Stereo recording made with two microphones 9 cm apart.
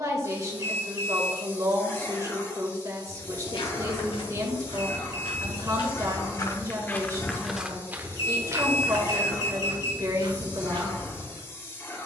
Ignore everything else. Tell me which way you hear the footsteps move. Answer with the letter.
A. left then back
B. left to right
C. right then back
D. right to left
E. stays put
B.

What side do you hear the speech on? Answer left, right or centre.
right.